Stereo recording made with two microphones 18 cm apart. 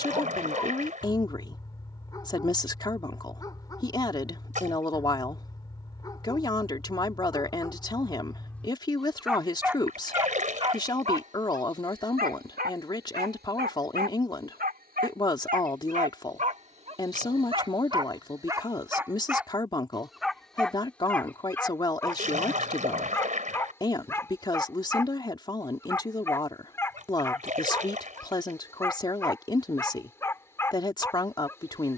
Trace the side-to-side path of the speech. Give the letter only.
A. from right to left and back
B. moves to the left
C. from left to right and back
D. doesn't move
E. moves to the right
D.